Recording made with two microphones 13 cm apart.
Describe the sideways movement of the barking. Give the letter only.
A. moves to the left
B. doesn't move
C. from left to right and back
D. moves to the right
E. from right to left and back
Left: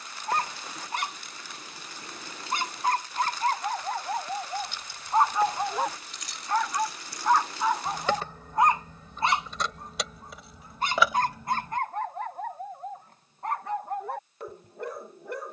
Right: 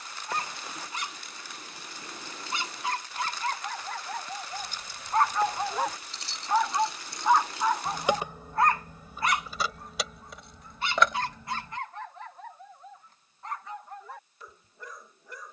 C.